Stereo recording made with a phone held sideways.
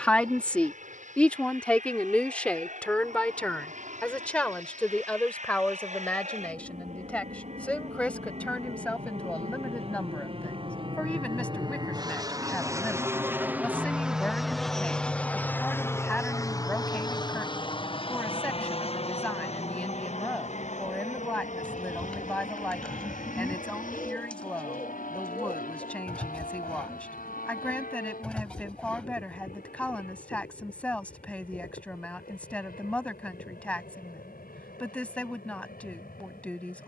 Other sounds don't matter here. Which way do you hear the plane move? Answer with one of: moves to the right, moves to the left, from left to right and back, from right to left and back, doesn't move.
moves to the left.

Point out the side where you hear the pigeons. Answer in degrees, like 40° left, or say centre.
10° left.